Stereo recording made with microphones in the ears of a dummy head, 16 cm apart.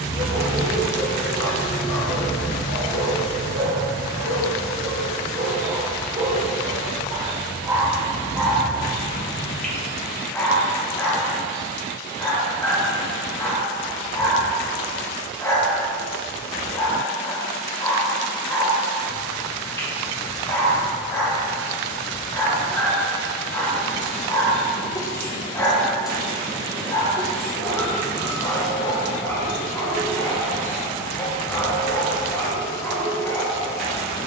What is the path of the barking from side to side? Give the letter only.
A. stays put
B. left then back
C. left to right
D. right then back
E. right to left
E.